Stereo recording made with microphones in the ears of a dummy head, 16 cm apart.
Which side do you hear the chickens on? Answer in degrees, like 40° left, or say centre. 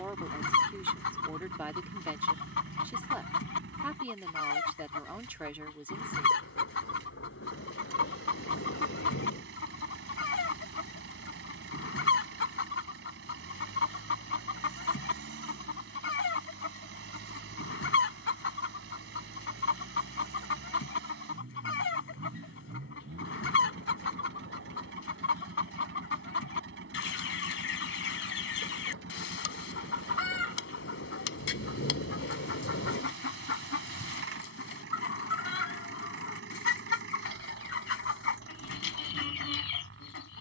70° left.